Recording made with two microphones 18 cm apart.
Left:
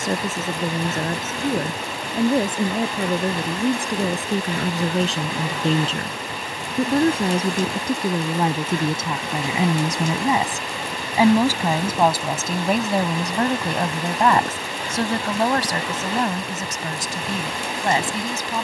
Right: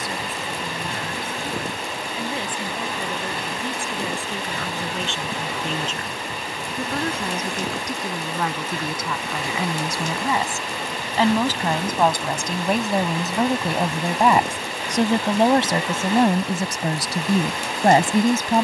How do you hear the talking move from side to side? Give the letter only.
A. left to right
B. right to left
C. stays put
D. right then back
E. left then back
A.